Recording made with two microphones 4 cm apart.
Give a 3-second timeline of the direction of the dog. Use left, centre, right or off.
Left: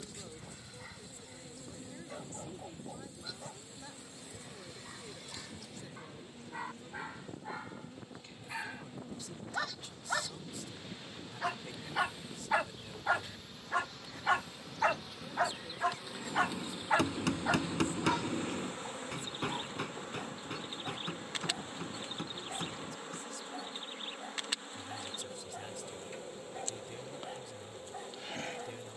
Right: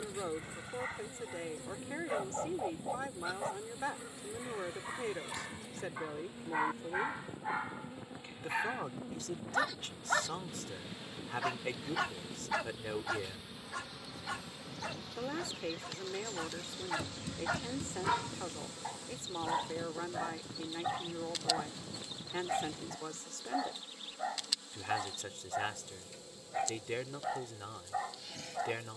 right, right, right, centre, left, left, right, right, right, right.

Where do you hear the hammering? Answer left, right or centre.
left.